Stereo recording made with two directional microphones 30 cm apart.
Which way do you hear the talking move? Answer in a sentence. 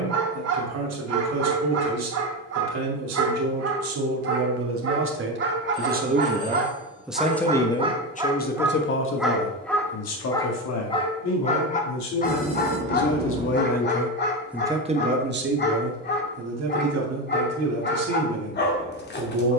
You can hear the talking go left and come back.